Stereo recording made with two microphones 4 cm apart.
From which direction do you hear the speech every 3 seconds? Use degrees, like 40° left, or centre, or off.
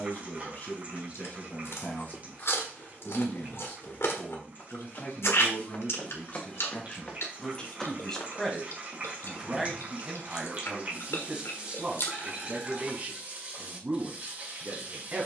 40° left, 40° left, 20° left, 10° right, 30° right.